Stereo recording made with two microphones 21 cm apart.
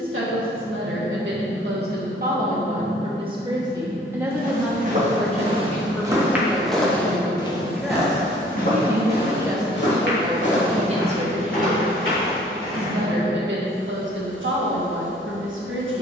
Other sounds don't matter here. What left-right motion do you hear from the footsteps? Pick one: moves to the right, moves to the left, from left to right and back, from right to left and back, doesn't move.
moves to the left.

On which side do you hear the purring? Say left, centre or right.
right.